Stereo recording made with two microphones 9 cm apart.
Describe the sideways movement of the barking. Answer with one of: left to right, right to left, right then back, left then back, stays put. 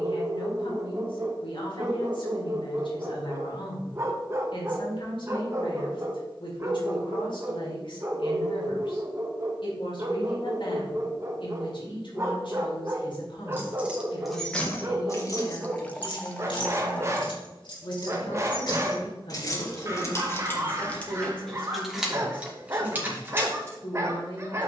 stays put.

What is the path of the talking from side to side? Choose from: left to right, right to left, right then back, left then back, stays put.
stays put.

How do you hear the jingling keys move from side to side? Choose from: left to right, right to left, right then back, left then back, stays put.
left then back.